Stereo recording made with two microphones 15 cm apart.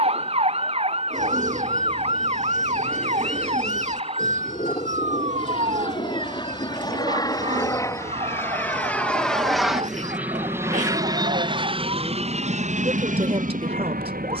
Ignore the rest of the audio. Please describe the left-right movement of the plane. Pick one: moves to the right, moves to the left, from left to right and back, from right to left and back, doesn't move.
moves to the right.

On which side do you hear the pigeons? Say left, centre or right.
right.